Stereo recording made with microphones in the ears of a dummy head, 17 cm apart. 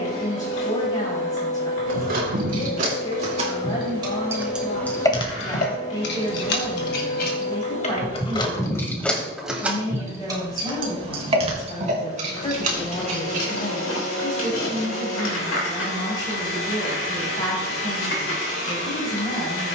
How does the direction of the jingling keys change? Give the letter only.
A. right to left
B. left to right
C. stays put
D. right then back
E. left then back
E.